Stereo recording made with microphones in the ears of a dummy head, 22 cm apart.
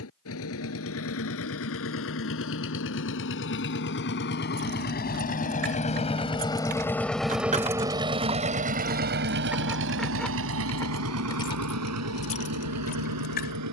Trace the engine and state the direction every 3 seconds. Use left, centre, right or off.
left, left, centre, right, right.